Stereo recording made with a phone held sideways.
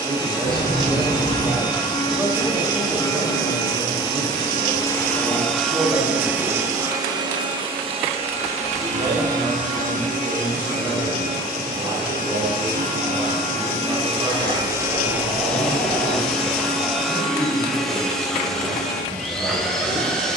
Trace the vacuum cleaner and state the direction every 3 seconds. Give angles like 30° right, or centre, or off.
20° left, 20° left, 30° right, 50° right, 40° right, centre, centre.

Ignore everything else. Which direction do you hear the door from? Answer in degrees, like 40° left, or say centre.
60° right.